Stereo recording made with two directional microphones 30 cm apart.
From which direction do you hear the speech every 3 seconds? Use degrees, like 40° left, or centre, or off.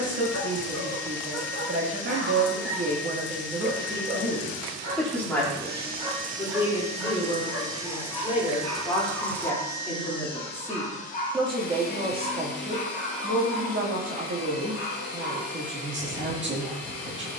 50° right, 10° right, 20° left, centre, 40° right, 40° right.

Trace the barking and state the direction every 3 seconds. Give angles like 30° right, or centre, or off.
50° right, 30° right, centre, 20° left, 40° left, 50° left.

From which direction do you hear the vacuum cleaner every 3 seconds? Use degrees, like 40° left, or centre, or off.
40° right, 40° right, 10° right, 20° left, 40° left, 50° left.